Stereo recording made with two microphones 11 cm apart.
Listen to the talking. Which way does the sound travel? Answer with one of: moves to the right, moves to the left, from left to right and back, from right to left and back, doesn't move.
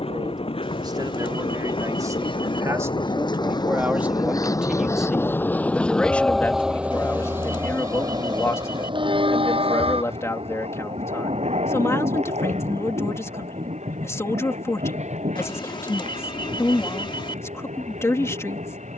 moves to the left.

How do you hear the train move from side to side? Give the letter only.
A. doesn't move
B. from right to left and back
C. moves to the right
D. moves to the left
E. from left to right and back
C.